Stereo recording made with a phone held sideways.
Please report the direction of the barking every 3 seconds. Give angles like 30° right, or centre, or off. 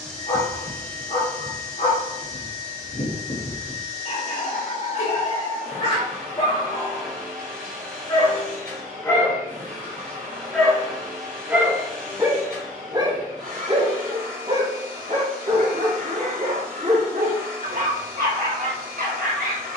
50° left, 40° left, 30° left, centre, 30° right, 60° right, 70° right.